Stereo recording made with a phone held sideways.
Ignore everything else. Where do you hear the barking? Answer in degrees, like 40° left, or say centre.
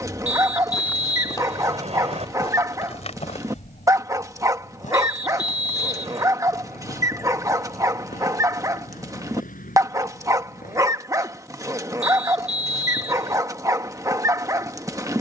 20° right.